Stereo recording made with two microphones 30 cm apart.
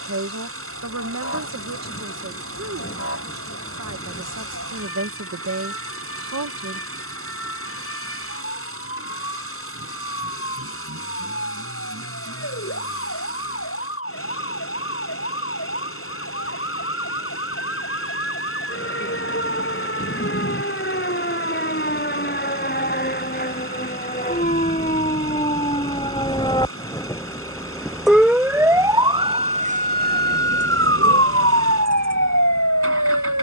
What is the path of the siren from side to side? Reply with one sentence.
In this clip you hear the siren go from the left side to the right.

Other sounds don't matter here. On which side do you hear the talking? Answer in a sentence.
In this clip you hear the talking on the right.